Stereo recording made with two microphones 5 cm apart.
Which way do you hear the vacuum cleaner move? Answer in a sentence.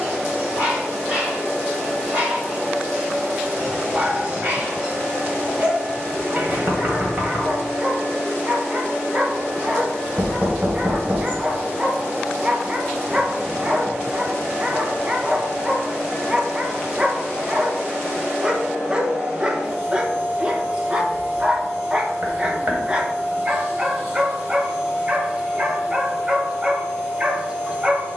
In this clip you hear the vacuum cleaner stay in one place.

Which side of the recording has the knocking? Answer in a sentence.
In this clip you hear the knocking on the right.